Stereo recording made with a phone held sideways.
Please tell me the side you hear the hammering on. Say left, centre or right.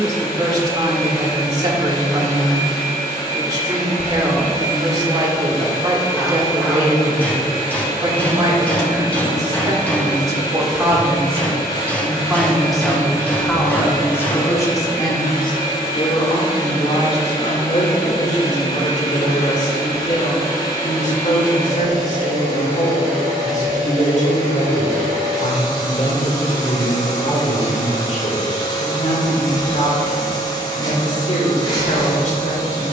centre.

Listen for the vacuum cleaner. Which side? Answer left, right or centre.
left.